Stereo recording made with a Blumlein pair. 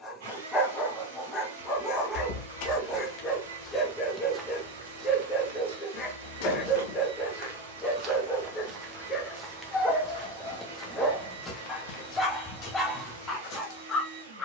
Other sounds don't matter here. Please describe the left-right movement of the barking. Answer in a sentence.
You can hear the barking stay in one place.